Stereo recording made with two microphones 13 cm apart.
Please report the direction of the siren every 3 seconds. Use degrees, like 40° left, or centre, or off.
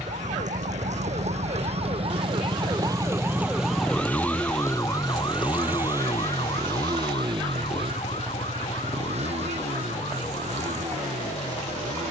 60° right, 10° left, 50° left, 60° left.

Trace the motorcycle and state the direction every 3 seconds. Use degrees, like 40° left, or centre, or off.
40° left, 10° left, 40° right, 60° right.